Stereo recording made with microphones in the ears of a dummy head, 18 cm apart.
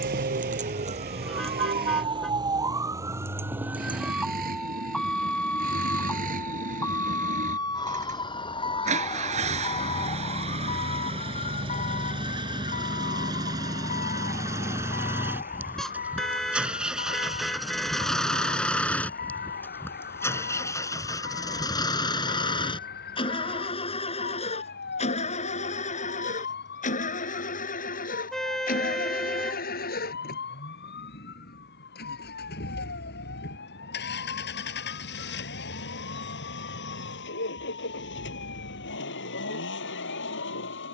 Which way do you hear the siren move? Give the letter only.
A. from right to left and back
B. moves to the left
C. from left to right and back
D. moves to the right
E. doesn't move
B.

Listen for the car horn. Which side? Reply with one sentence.
In this clip you hear the car horn in the centre.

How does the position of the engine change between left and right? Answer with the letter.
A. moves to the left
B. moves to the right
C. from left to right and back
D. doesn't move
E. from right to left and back
A.